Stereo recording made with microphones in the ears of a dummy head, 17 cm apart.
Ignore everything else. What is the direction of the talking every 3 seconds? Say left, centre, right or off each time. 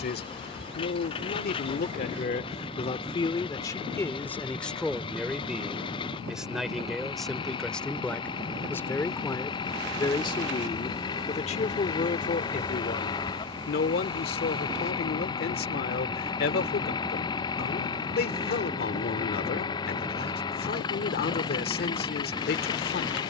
left, centre, centre, left, left, left, left, left.